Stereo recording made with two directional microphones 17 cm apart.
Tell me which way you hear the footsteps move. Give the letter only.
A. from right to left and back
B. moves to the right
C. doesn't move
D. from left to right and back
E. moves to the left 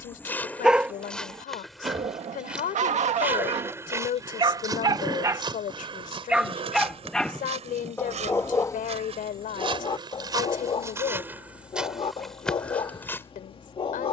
D.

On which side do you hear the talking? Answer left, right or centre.
left.